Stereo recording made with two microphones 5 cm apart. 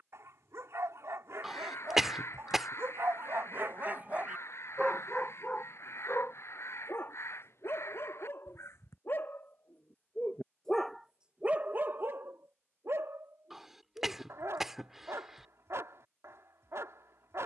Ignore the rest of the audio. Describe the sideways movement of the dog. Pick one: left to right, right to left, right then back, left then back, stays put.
left then back.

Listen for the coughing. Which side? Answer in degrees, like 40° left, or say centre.
10° right.